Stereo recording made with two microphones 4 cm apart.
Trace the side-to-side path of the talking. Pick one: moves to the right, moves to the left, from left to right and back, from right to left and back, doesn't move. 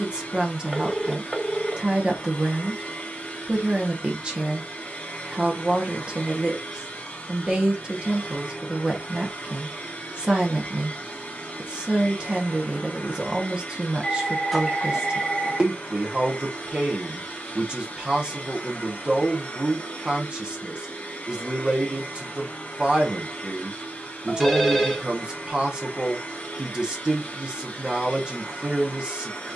doesn't move.